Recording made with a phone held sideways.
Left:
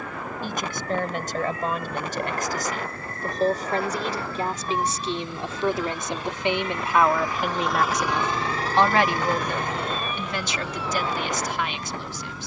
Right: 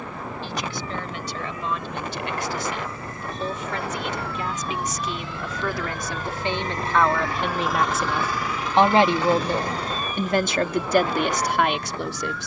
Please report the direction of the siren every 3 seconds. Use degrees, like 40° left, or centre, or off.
70° left, 50° left, 20° left, 50° right.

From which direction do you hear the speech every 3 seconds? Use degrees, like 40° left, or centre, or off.
50° left, 30° left, centre, 50° right.